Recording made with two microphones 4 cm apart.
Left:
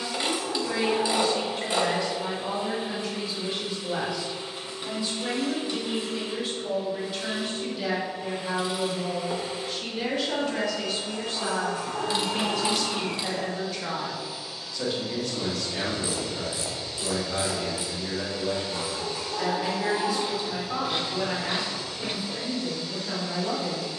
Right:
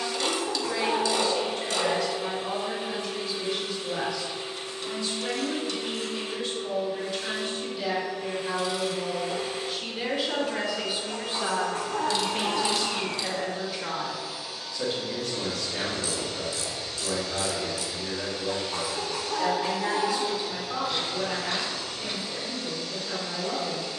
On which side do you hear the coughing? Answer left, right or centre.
right.